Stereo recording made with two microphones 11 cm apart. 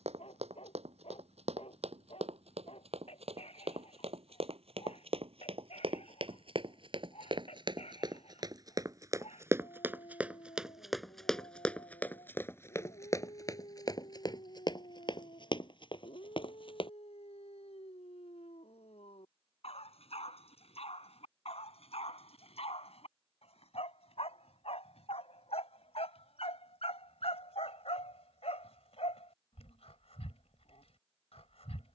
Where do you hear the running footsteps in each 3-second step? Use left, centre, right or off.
right, right, right, centre, left, left, off, off, off, off, off.